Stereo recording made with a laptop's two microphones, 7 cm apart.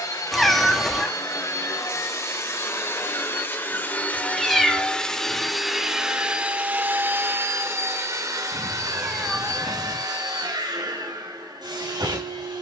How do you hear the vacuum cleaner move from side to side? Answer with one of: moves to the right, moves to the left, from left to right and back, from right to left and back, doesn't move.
moves to the right.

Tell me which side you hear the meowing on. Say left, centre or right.
centre.